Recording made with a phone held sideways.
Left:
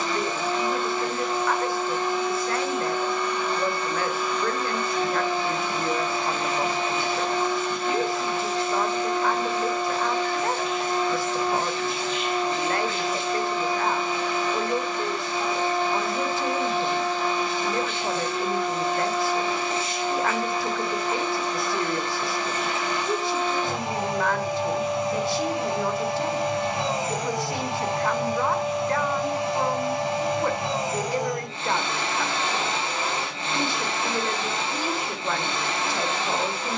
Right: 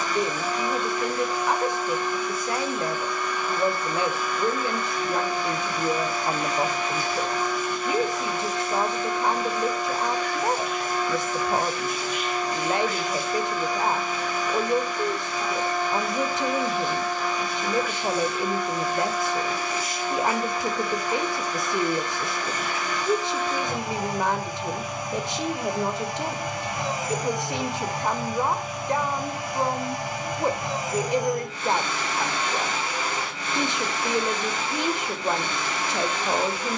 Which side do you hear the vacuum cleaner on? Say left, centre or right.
left.